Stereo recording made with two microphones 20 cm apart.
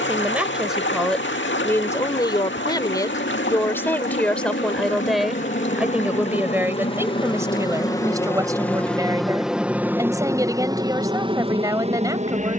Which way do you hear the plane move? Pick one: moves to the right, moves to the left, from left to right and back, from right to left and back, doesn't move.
moves to the right.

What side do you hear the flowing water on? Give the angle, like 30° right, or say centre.
70° left.